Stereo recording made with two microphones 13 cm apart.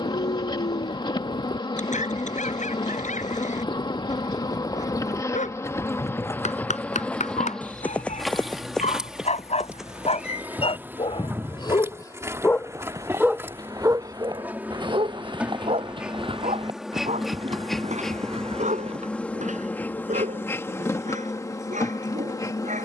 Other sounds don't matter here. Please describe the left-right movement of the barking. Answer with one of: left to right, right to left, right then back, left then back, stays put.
left to right.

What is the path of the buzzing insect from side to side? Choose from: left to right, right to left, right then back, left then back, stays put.
right then back.